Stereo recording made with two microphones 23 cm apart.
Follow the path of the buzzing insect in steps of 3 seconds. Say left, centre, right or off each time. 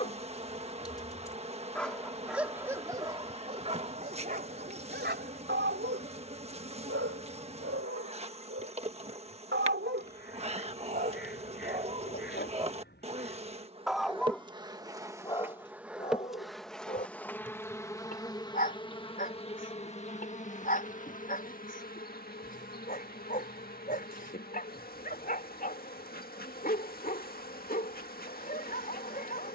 right, right, right, right, right, centre, left, left, left, left.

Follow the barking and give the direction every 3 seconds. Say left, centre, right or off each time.
centre, right, right, right, centre, left, left, left, left, left.